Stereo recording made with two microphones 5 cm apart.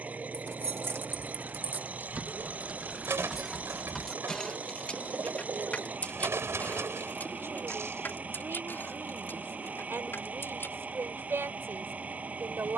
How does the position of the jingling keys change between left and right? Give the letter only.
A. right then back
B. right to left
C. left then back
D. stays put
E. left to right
B.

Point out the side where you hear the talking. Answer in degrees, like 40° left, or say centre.
60° right.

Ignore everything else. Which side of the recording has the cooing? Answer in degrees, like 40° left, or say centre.
60° right.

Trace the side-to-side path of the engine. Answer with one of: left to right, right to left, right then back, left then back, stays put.
stays put.